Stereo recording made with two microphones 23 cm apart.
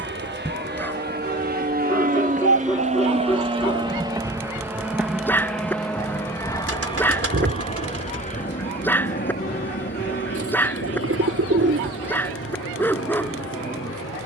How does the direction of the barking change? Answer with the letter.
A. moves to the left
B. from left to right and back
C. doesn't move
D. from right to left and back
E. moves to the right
C.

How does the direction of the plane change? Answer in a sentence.
You can hear the plane go from the right side to the left.